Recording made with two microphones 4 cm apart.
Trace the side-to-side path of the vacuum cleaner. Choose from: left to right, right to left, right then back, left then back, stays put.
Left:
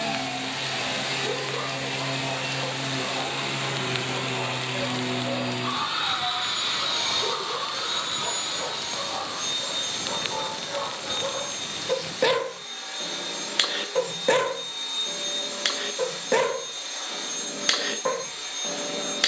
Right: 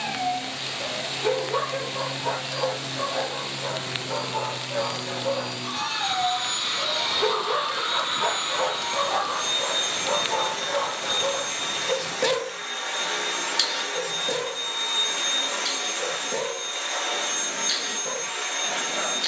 left to right.